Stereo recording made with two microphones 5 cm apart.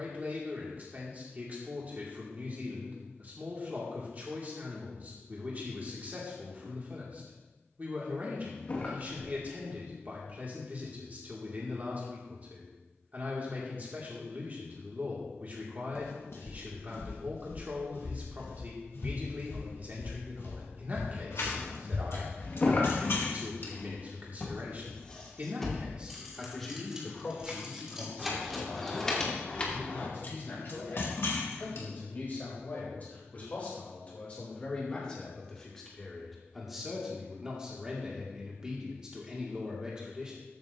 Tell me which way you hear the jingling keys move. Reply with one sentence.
You can hear the jingling keys move from left to right and back again.